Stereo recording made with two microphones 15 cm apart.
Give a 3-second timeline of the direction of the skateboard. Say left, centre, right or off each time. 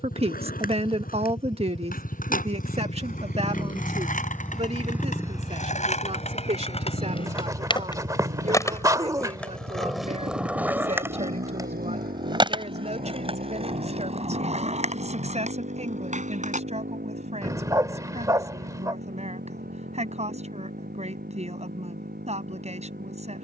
left, left, left, centre, right, right, off, off.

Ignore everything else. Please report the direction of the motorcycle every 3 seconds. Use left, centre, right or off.
left, centre, right, right, right, right, right, right.